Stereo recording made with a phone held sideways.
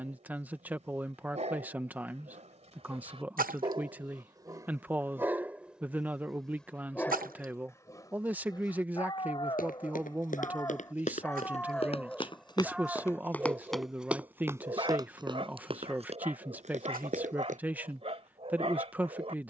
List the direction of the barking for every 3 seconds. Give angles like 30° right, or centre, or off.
50° right, 20° right, 20° left, 20° left, 10° right, 40° right, 40° right.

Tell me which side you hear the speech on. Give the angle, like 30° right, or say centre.
10° right.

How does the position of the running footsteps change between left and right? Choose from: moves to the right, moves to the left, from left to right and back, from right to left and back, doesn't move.
moves to the right.